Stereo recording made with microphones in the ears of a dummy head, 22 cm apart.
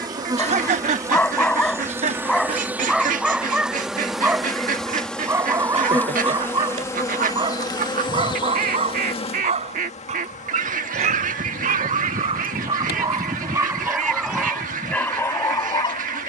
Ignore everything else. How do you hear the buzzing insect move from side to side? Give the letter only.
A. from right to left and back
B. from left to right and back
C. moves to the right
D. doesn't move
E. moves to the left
E.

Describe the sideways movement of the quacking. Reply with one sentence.
You can hear the quacking stay put.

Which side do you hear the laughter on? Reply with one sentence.
In this clip you hear the laughter on the right.